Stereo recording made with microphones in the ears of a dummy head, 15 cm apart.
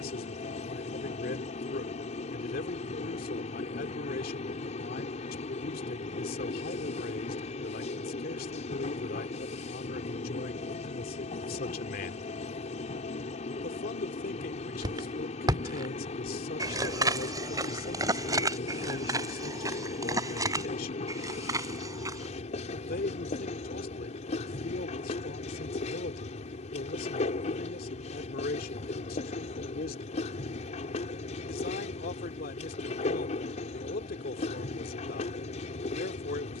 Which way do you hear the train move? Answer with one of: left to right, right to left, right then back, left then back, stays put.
stays put.